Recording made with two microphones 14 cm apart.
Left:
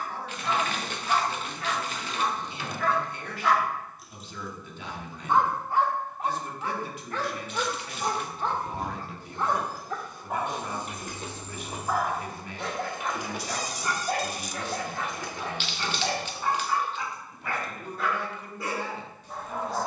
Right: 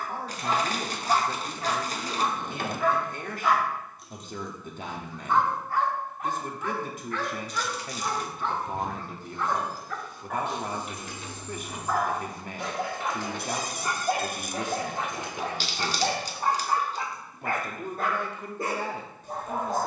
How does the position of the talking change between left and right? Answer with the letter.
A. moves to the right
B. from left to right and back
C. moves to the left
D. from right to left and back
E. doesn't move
E.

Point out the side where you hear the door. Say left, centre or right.
right.